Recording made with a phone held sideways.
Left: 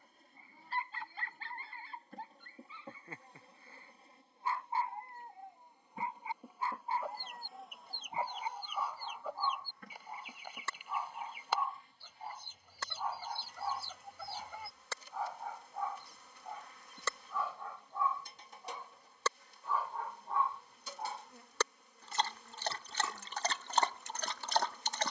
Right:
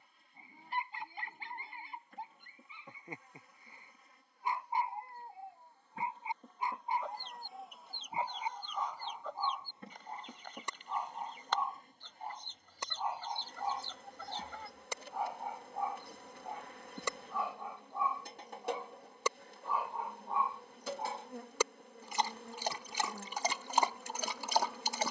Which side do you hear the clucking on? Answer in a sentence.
In this clip you hear the clucking in the centre.